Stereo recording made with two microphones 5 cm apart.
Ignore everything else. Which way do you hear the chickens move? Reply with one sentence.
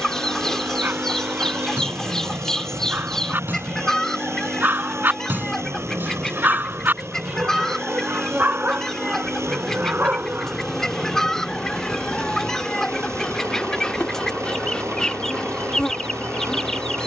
You can hear the chickens stay put.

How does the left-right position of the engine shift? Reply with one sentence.
You can hear the engine stay put.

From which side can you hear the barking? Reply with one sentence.
In this clip you hear the barking on the right.